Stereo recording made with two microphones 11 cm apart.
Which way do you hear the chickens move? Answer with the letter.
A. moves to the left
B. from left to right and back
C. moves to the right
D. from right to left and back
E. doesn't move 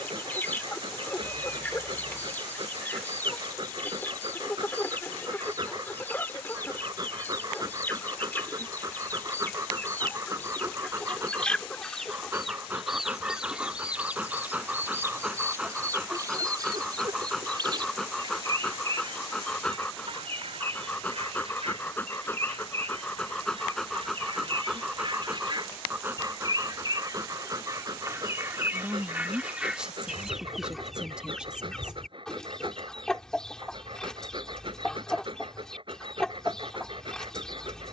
B.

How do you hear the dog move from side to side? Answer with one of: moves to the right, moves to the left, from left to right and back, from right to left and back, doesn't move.
from right to left and back.